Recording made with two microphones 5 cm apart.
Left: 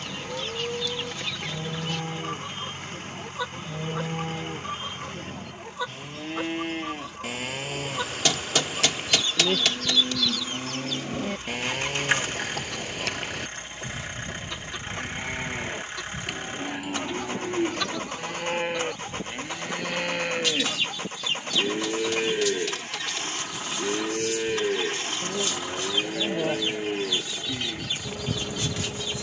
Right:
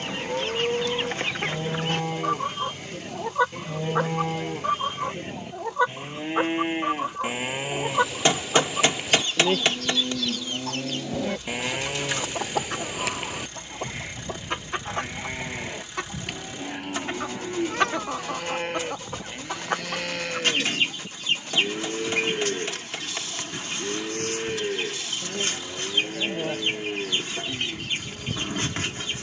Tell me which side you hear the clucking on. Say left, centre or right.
right.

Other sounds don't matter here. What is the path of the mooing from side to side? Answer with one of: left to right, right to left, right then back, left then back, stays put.
right to left.